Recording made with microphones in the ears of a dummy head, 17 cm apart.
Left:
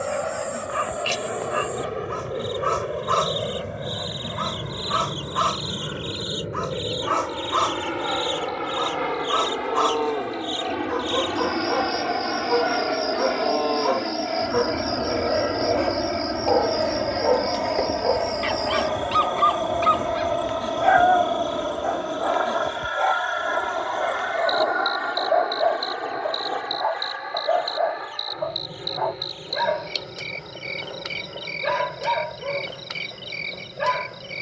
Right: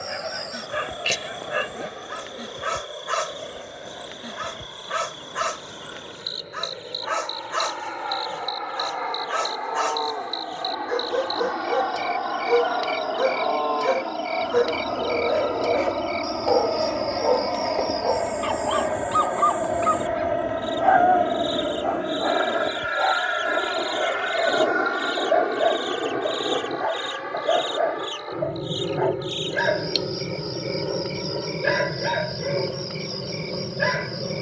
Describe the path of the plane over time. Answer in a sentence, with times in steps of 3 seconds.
In this clip you hear the plane on the left from 0 s, in the centre from 15 s and on the right from 21 s.